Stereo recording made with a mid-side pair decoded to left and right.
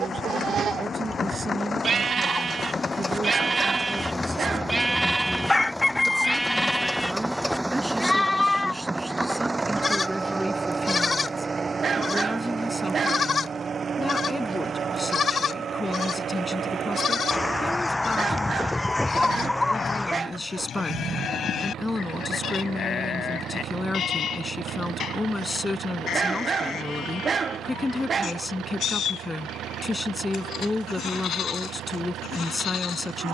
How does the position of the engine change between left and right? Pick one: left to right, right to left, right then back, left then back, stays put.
left to right.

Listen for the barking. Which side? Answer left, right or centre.
right.